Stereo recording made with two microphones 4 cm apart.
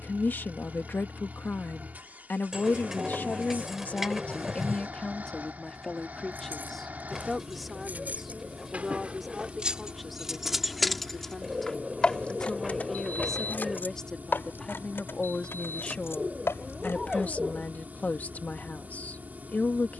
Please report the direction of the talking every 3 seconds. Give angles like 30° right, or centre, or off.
50° left, 30° left, centre, centre, 10° left, 30° left, 40° left.